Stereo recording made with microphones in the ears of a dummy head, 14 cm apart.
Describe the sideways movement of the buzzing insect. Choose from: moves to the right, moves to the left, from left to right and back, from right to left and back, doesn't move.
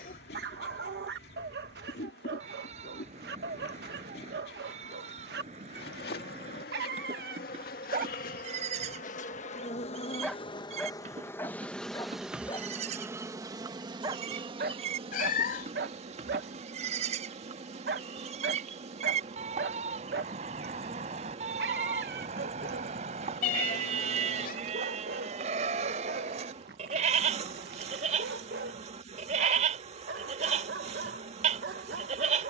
moves to the right.